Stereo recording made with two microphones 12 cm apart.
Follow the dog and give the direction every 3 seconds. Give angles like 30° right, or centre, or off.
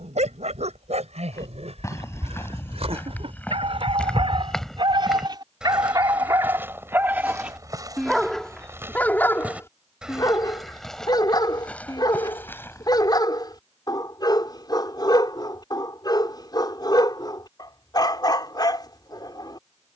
60° right, 50° right, 10° right, 30° left, 30° left, 30° left, 30° left.